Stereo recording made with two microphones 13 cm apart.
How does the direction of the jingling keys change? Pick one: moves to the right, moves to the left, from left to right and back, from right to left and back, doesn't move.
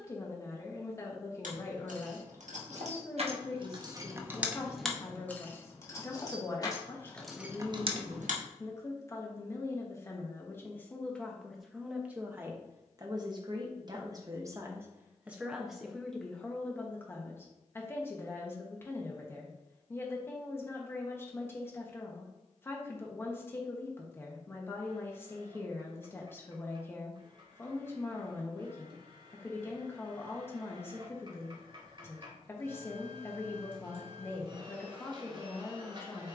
from right to left and back.